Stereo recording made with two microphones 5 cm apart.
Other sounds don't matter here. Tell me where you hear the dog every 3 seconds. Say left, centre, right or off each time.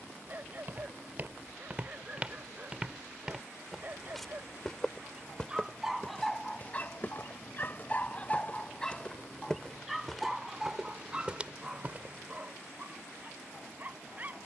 right, right, left, centre, right.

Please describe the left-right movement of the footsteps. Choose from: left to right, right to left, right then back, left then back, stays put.
left then back.